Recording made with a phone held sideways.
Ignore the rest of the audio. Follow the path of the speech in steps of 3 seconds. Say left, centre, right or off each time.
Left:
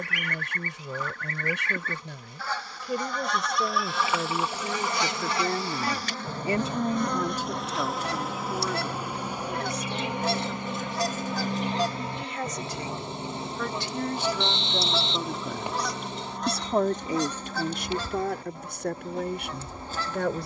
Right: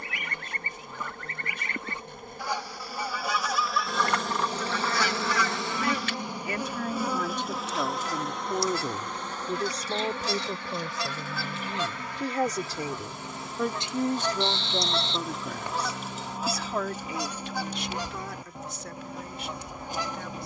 left, left, centre, right, right, left, left.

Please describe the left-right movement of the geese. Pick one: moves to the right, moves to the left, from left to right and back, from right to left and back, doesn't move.
from right to left and back.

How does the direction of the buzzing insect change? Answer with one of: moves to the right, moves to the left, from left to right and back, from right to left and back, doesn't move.
moves to the left.